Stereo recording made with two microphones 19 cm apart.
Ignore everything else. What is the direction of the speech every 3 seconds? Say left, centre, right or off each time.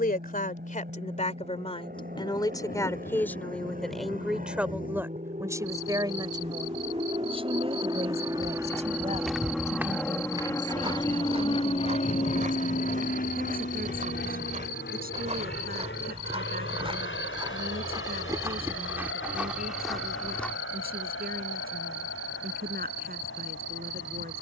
left, centre, right, right, right, right, right, right.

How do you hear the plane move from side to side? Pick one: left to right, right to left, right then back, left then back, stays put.
right to left.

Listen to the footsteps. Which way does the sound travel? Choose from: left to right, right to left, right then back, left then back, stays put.
right then back.